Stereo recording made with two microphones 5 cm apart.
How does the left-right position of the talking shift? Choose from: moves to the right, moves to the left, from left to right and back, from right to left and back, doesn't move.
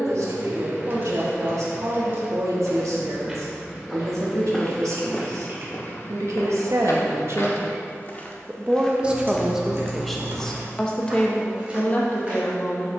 moves to the left.